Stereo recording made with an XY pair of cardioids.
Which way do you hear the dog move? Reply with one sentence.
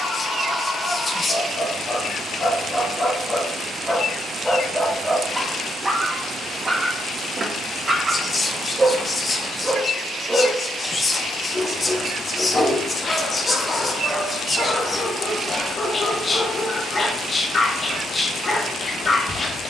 In this clip you hear the dog go right and come back.